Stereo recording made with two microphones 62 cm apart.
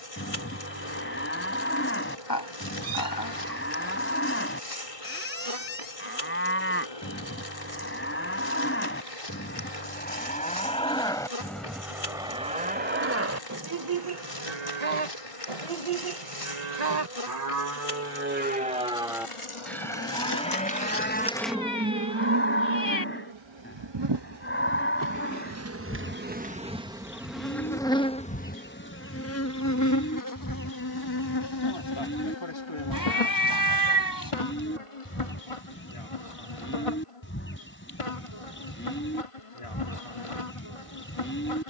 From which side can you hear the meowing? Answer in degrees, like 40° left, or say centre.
30° left.